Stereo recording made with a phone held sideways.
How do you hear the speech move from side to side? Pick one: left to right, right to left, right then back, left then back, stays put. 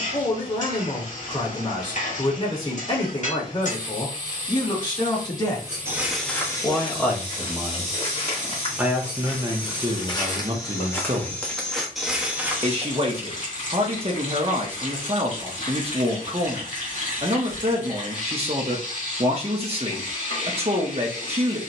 left to right.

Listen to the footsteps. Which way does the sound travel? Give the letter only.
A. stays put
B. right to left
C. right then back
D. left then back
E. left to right
D.